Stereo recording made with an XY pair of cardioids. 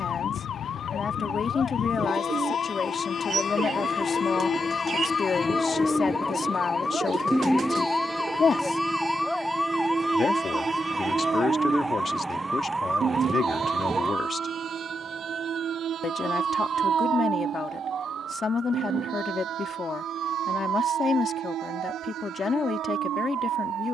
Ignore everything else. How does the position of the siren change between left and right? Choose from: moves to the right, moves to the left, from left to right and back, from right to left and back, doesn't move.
moves to the right.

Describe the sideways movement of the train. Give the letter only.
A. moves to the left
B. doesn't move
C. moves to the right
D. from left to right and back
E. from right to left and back
C.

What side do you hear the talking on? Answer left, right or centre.
left.